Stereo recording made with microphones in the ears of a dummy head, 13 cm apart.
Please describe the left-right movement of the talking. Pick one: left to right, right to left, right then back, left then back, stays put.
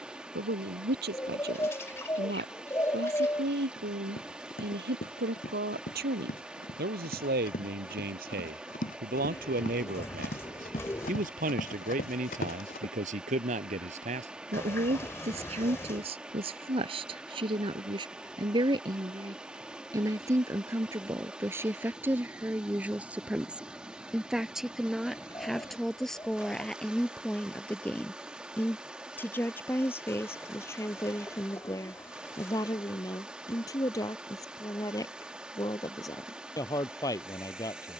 right to left.